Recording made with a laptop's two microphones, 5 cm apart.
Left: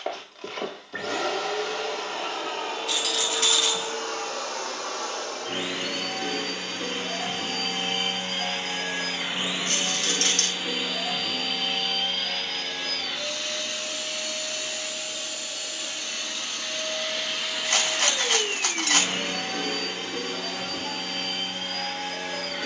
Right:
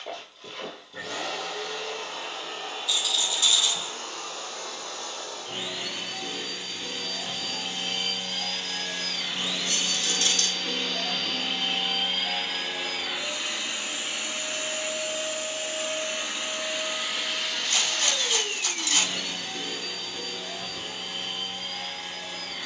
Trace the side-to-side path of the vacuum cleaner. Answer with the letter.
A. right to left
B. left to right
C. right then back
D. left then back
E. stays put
C.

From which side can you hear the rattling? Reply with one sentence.
You can hear the rattling on the left.